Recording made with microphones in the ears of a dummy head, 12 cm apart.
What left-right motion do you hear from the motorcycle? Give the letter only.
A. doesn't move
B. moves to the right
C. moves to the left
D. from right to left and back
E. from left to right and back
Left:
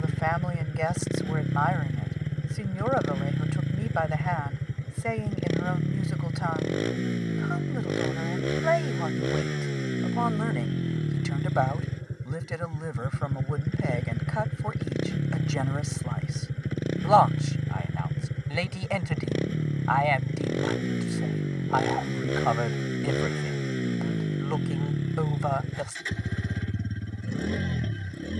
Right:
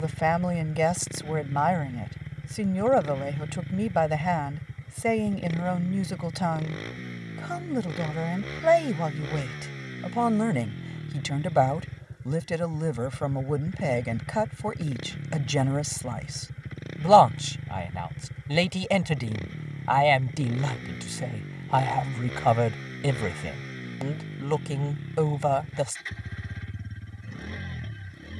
A.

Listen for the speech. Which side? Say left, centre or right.
right.